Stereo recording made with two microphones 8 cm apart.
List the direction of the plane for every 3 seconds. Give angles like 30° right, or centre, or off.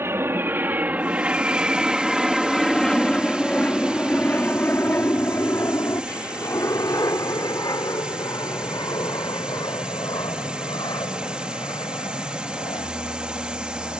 10° right, 20° left, 50° left, 60° left, 60° left.